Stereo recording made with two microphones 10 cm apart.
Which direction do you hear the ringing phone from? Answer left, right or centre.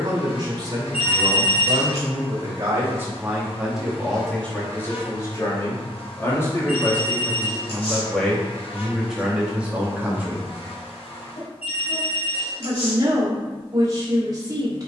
left.